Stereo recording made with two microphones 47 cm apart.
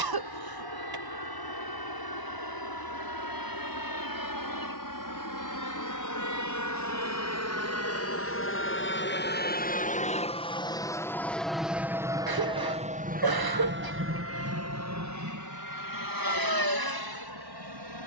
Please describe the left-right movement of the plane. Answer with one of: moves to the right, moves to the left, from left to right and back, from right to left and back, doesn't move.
moves to the right.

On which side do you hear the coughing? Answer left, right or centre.
right.